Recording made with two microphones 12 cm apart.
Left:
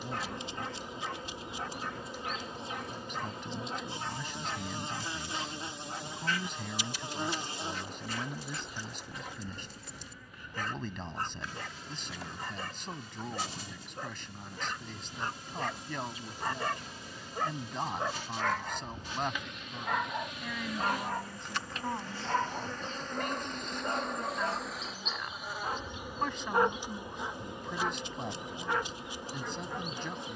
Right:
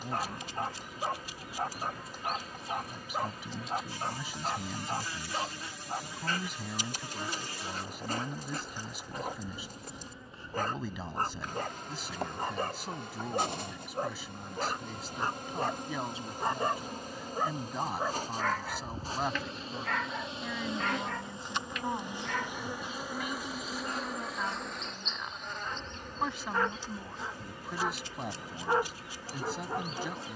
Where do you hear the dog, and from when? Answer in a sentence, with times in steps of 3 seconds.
You can hear the dog on the right from 0 s, in the centre from 18 s, on the left from 21 s and on the right from 27 s.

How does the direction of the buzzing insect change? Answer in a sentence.
In this clip you hear the buzzing insect go right and come back.